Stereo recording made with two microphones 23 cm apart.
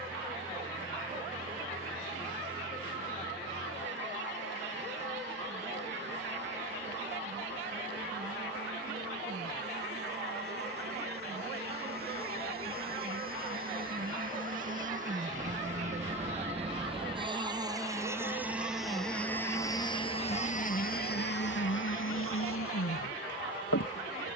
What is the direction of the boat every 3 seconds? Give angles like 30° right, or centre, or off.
50° right, 50° right, 50° right, 50° right, 40° right, 30° right, 10° left, 60° left.